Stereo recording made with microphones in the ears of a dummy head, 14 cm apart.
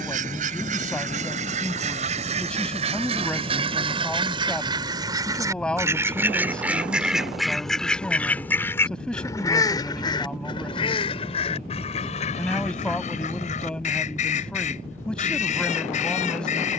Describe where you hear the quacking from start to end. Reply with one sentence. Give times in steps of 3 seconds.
You can hear the quacking on the right from 0 s, in the centre from 6 s and on the left from 9 s.